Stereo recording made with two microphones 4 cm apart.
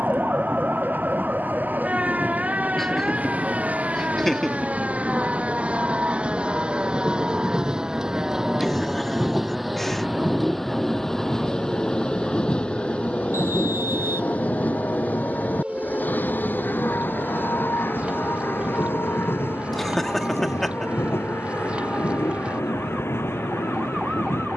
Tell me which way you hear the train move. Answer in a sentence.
In this clip you hear the train go from the right side to the left.